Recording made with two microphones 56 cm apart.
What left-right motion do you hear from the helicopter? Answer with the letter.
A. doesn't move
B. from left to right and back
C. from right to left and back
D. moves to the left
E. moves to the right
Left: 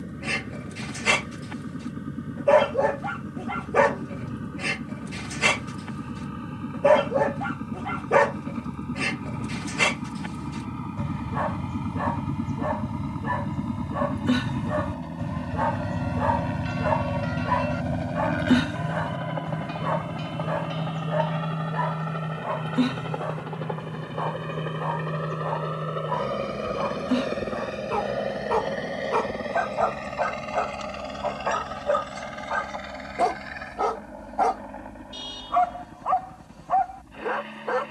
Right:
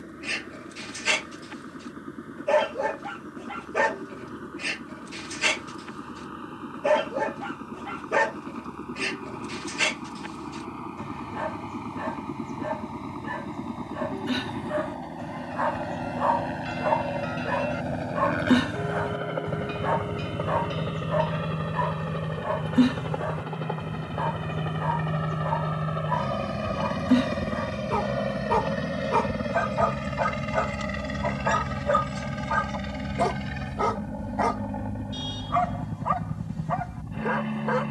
E.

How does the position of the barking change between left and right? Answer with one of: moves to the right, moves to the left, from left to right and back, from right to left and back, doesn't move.
moves to the right.